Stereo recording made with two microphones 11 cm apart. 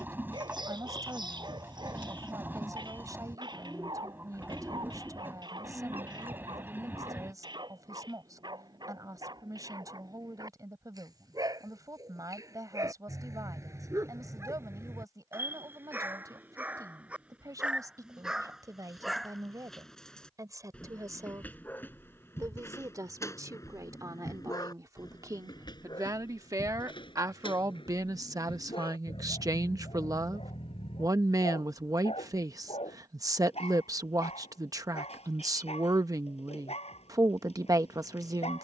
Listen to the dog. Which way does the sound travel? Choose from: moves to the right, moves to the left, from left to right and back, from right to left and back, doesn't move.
moves to the left.